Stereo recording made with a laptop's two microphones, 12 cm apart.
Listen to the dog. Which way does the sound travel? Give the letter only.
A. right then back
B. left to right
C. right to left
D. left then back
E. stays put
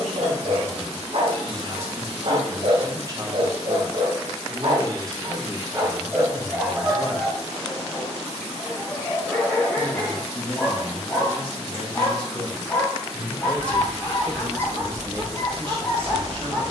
C.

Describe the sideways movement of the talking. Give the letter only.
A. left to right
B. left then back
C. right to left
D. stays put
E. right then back
B.